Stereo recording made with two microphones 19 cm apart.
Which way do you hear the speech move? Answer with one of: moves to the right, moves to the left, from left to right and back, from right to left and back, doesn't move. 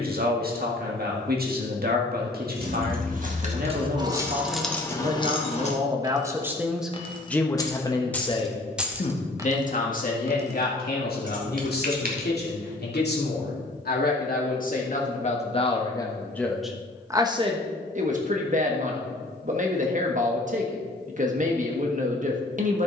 from right to left and back.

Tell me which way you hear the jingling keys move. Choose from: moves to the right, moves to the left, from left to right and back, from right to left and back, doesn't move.
from right to left and back.